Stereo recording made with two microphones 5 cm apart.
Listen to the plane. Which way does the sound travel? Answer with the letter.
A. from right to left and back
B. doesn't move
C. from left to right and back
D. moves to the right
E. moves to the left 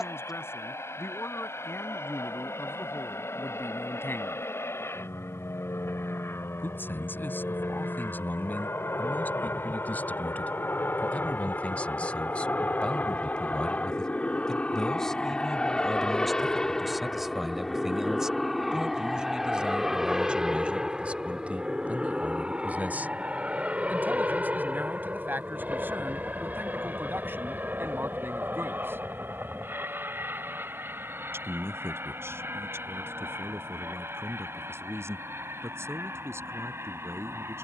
D.